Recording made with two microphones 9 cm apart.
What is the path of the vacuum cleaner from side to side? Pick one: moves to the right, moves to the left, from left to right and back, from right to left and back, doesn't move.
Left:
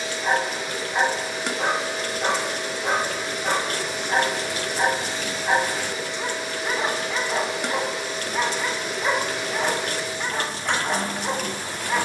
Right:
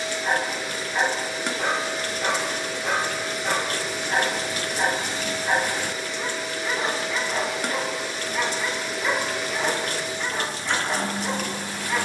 doesn't move.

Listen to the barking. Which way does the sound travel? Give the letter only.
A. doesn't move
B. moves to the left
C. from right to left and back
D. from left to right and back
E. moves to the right
A.